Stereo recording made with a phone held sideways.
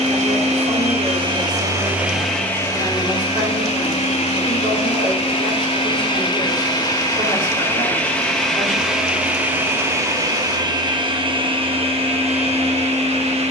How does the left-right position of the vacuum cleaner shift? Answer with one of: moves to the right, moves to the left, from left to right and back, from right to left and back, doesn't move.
from right to left and back.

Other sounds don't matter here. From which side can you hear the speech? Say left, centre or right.
right.